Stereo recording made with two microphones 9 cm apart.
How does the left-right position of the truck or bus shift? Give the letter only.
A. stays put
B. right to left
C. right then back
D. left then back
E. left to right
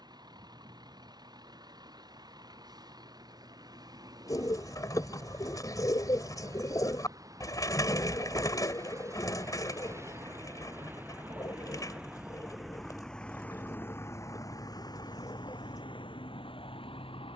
B.